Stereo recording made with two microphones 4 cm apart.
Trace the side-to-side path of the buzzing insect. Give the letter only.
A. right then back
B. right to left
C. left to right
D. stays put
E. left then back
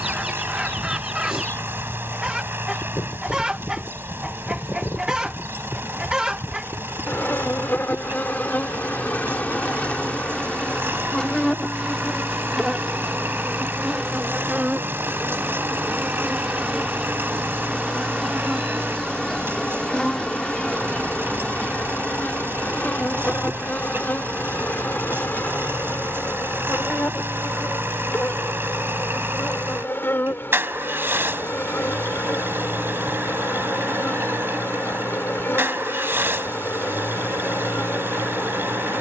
A.